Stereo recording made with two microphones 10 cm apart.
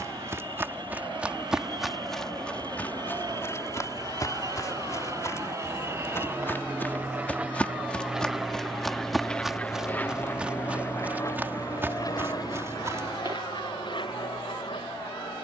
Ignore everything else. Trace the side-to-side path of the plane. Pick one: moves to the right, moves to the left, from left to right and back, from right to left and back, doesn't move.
moves to the left.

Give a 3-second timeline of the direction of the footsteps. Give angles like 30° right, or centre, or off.
10° right, 30° left, 10° left, 10° right, 30° right.